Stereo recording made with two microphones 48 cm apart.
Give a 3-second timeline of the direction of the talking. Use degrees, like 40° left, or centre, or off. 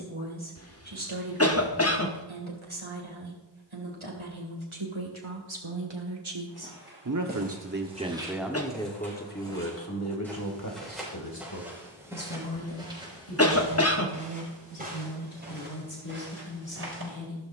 80° right, 70° right, 30° right, 30° left, 60° left, 60° left.